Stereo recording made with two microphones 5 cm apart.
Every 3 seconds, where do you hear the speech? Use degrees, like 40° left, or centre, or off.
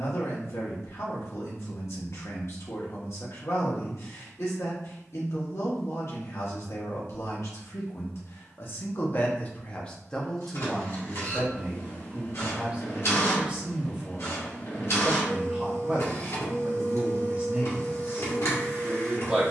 60° left, 60° left, 60° left, 10° left, 20° right, 20° right, 20° right.